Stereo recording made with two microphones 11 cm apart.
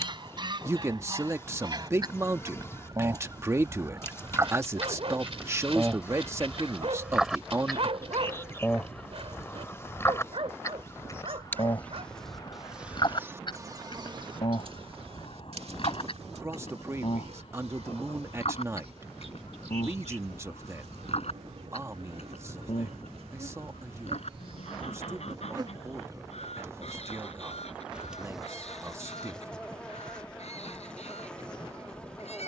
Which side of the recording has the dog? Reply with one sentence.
In this clip you hear the dog on the right.